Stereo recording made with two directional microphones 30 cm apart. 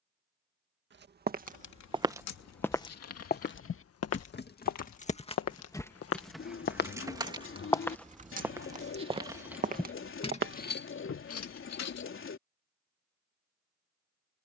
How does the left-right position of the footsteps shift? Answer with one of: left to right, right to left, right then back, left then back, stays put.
left then back.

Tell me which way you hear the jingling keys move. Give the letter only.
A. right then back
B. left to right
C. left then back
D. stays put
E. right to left
A.